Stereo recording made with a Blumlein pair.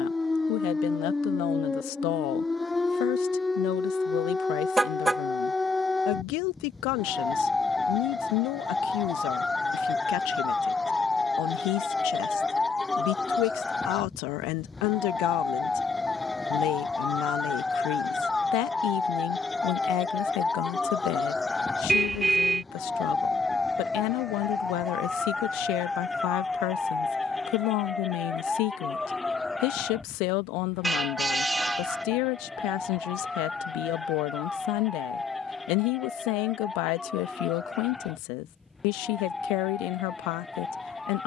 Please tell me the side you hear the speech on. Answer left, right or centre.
left.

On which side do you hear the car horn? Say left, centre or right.
centre.